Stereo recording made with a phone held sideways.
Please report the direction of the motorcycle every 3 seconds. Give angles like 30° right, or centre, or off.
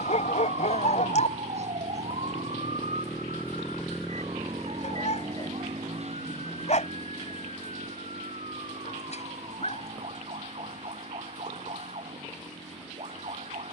60° left, 10° right, 60° right, 70° right, 70° right.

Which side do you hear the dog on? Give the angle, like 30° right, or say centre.
60° left.